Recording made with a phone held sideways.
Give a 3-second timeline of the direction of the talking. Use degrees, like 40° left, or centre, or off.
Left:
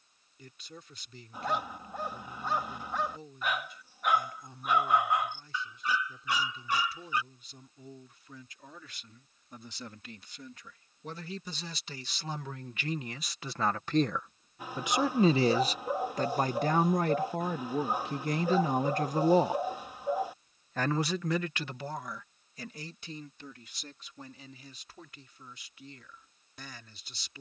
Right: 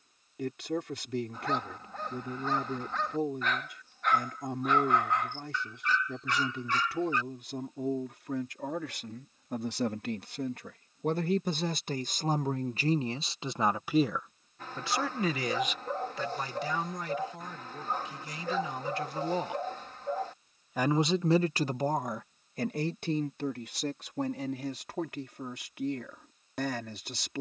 70° right, 70° right, 70° right, 60° right, 20° right, 50° left, 40° left, 50° right, 70° right.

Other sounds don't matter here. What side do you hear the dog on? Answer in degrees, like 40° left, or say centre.
10° left.